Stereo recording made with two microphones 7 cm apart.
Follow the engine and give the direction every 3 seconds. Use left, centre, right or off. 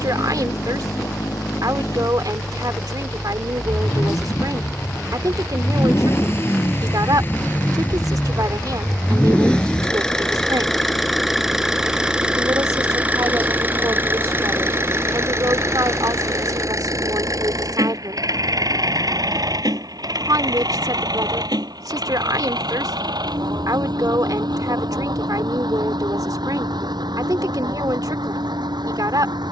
left, left, left, centre, right, right, right, right, right, right.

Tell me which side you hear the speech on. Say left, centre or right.
right.